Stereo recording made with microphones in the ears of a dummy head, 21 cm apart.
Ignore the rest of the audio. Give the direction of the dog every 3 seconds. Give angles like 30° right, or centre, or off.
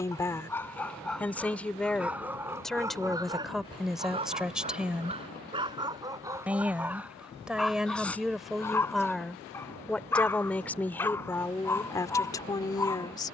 centre, 20° right, centre, 10° left, 10° left.